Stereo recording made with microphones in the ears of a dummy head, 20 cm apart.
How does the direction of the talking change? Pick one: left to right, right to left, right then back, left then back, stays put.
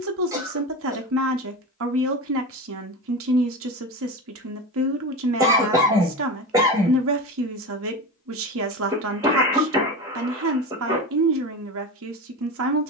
stays put.